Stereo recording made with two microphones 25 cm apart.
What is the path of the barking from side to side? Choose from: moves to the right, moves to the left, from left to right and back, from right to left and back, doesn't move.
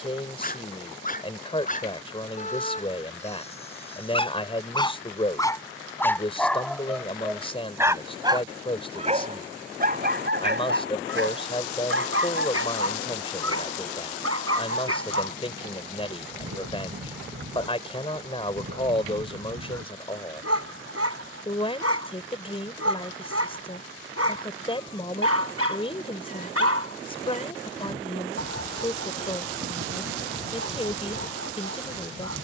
moves to the right.